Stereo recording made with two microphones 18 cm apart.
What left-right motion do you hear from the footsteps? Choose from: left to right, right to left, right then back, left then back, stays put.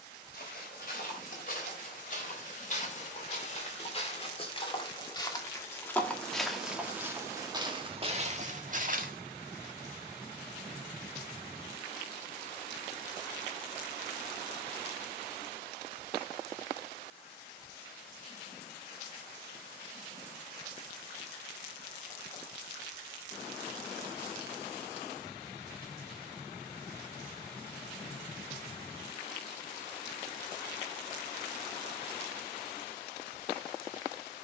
left to right.